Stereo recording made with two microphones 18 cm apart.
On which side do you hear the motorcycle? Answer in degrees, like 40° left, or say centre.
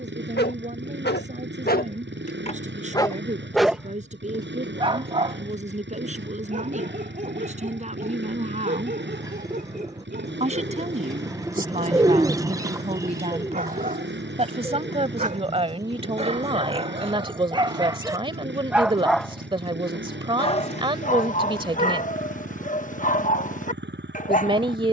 80° right.